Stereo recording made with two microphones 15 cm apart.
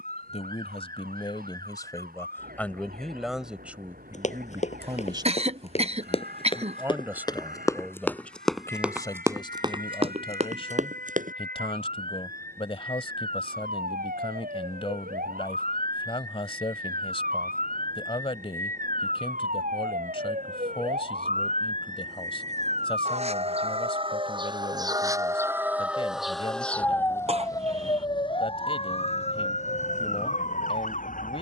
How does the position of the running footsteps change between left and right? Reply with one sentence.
You can hear the running footsteps travel towards the right.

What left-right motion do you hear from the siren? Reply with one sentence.
You can hear the siren travel towards the left.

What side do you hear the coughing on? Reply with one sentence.
You can hear the coughing on the right.